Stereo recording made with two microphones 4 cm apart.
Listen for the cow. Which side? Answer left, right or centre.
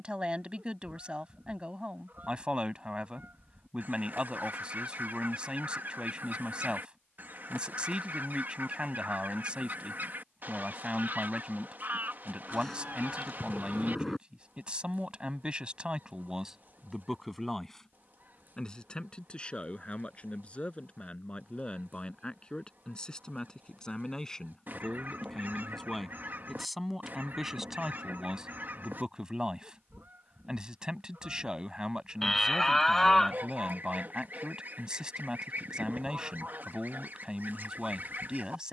centre.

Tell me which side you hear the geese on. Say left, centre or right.
right.